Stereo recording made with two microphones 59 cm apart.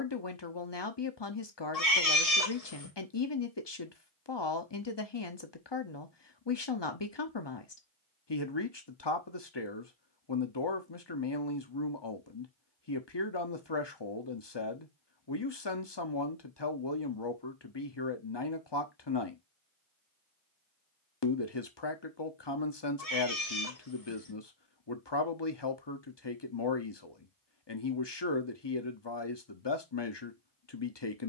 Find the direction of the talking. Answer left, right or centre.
left.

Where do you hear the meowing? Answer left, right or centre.
left.